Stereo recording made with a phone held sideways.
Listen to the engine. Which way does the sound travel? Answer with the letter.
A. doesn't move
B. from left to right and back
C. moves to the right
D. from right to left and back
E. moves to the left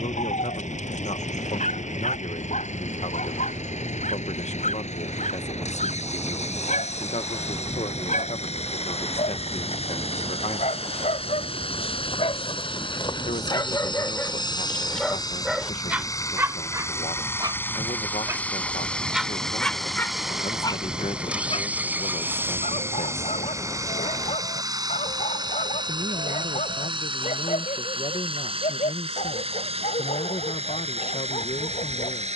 C.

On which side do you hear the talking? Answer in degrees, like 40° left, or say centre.
60° left.